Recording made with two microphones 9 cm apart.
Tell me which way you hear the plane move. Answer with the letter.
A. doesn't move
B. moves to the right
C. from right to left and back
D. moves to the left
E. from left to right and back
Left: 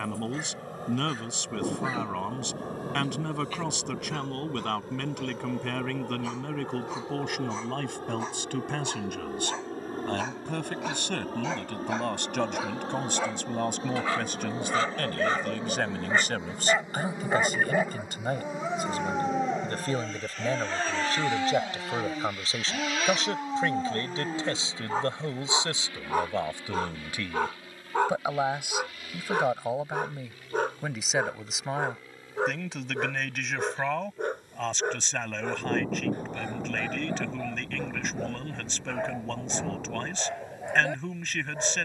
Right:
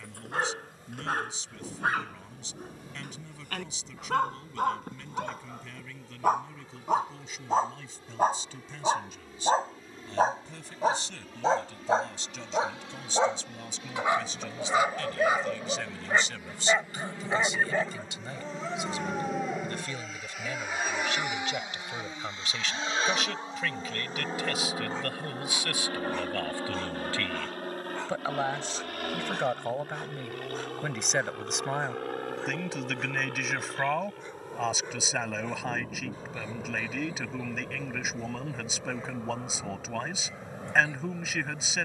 B.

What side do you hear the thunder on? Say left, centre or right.
left.